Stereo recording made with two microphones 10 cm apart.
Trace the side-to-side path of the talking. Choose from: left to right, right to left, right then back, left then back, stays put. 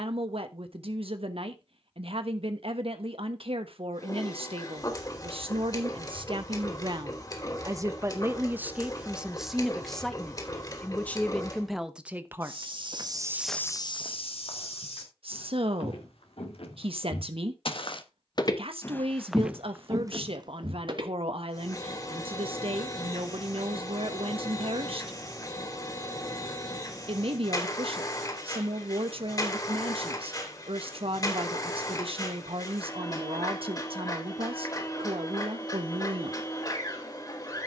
left then back.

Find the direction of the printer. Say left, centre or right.
left.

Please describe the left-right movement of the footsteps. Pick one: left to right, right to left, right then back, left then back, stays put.
left then back.